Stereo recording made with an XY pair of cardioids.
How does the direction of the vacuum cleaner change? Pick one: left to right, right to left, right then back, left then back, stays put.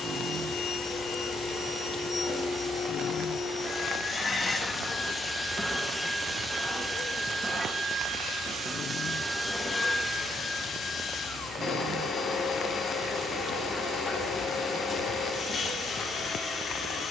right then back.